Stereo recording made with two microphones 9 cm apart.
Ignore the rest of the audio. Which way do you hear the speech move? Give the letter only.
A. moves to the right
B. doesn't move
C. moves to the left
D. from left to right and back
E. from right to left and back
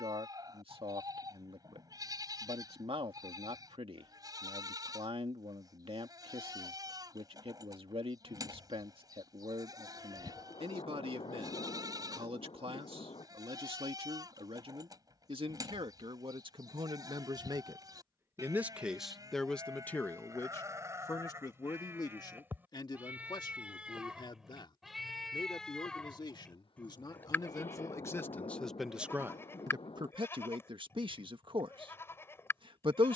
E.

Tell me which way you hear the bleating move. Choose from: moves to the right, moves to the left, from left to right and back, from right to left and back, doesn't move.
moves to the left.